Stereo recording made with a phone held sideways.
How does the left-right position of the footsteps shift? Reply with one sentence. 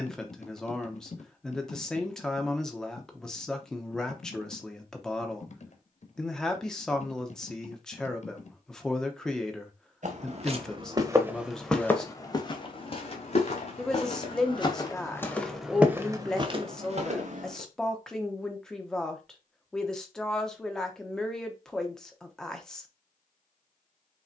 In this clip you hear the footsteps move from right to left and back again.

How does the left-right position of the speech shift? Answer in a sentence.
You can hear the speech stay put.